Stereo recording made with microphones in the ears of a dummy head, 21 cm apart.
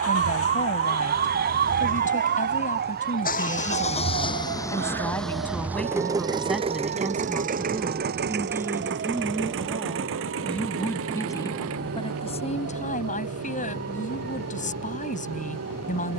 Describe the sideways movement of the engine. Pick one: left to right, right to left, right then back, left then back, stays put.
left to right.